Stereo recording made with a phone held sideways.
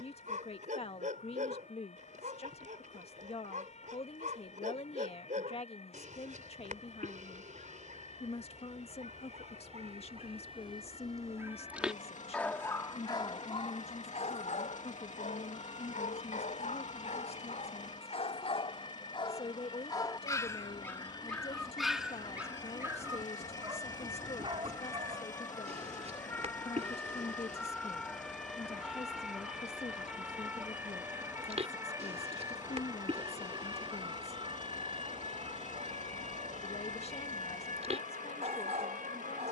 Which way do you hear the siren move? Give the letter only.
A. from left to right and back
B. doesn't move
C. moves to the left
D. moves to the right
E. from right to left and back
D.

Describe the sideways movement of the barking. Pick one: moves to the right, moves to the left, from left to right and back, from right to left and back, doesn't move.
from right to left and back.